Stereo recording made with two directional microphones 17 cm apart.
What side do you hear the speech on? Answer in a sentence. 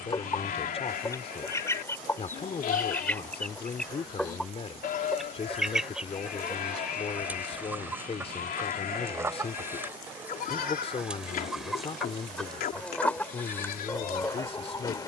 You can hear the speech on the left.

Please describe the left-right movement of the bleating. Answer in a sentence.
You can hear the bleating stay in one place.